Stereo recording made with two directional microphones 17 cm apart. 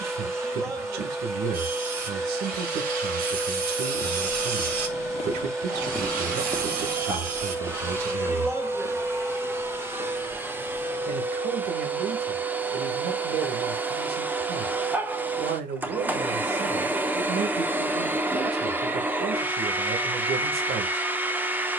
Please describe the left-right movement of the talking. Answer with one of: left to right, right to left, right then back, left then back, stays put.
stays put.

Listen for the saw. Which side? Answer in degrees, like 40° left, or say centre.
60° right.